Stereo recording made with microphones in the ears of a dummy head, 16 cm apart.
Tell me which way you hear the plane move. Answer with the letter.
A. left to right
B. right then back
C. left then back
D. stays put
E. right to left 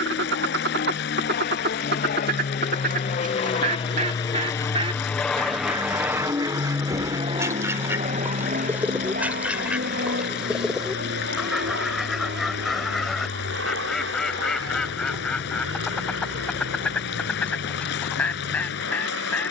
A.